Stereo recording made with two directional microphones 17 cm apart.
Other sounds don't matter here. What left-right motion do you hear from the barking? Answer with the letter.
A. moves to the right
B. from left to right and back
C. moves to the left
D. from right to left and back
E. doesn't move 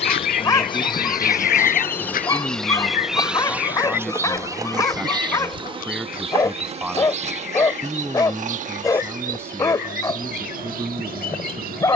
E.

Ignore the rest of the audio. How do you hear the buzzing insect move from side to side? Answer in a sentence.
In this clip you hear the buzzing insect move to the right.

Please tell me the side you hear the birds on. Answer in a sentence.
You can hear the birds on the left.